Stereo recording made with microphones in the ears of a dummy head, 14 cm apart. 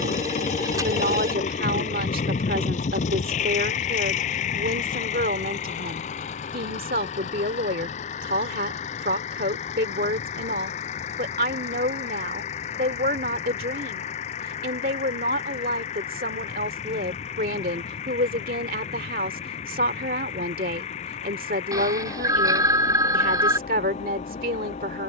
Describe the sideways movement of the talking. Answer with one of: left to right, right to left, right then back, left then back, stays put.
stays put.